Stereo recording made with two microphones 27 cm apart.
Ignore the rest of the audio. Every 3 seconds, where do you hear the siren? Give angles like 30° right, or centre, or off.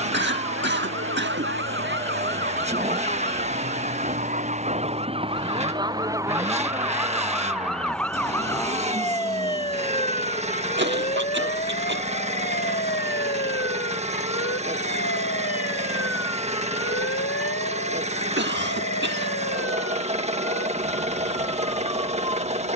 50° right, 30° right, centre, 20° left, 40° left, 50° left, 60° left, 60° left.